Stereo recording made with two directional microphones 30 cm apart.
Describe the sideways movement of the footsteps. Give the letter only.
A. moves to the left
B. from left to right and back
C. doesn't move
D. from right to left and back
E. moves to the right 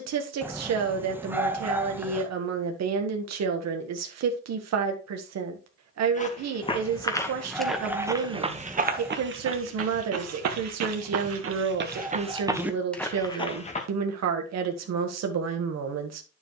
B.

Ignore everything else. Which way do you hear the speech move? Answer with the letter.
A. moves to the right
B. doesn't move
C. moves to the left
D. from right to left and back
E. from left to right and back
B.